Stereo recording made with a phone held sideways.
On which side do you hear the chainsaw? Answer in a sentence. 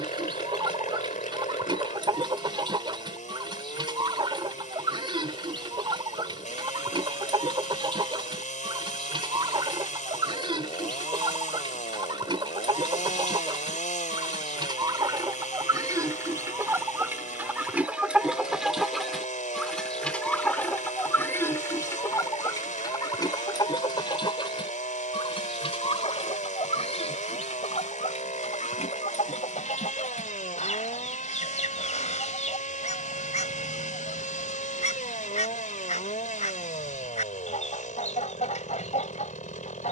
In this clip you hear the chainsaw on the left.